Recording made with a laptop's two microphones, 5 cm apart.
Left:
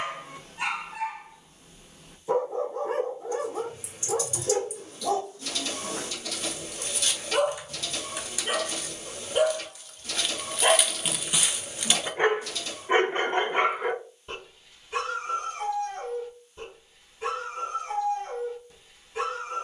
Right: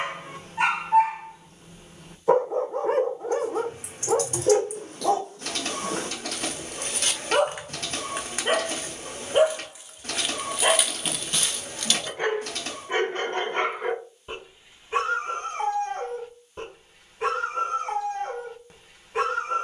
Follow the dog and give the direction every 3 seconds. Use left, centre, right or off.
right, right, right, centre, centre, right, right.